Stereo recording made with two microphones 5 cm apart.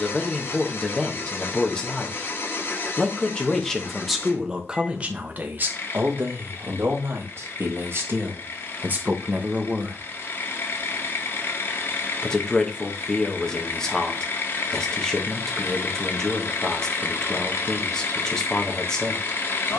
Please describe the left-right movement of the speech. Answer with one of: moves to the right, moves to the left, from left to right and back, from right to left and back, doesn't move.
from left to right and back.